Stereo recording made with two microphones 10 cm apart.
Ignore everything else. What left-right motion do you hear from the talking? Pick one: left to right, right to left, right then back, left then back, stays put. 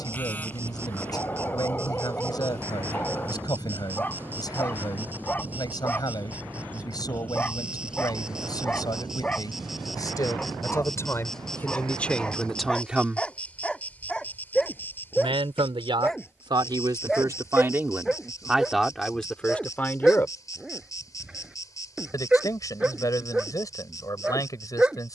right then back.